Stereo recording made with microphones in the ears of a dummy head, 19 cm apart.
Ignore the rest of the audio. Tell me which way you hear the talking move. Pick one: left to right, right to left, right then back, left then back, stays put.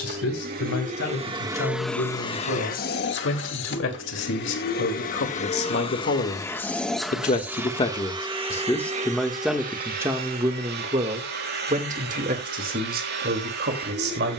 left to right.